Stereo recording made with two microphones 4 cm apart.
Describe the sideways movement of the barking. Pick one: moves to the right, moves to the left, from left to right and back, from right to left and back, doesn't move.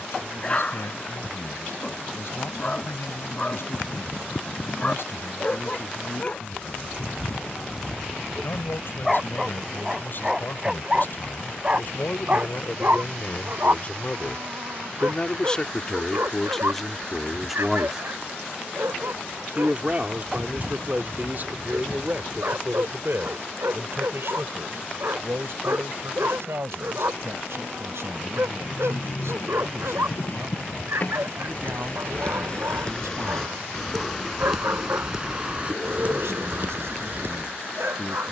moves to the right.